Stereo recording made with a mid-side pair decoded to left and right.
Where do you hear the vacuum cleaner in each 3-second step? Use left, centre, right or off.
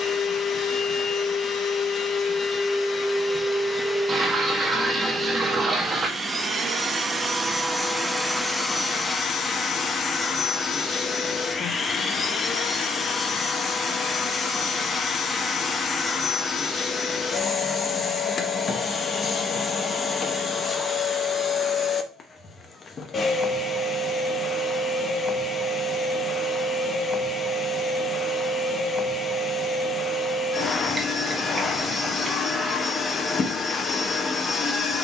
left, centre, centre, left, left, left, left, left, left, left, left, left.